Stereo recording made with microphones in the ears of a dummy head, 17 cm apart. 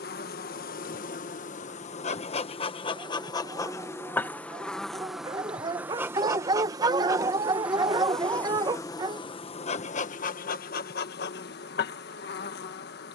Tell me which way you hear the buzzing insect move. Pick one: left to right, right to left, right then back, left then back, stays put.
right then back.